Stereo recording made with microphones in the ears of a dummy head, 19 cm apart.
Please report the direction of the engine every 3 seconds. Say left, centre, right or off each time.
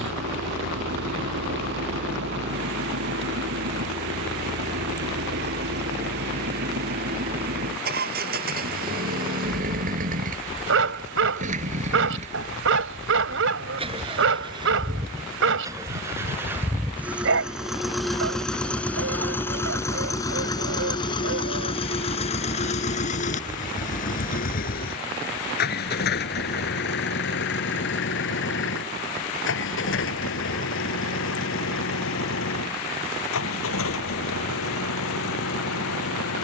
right, right, right, right, right, centre, centre, left, left, left, left, left.